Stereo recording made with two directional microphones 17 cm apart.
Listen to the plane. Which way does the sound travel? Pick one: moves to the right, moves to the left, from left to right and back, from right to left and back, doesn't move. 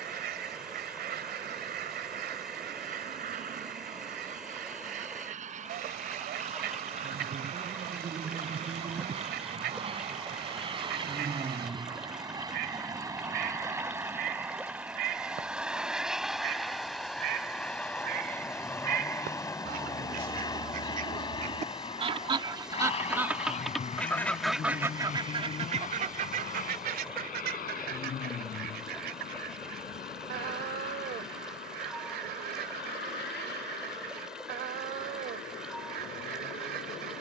moves to the left.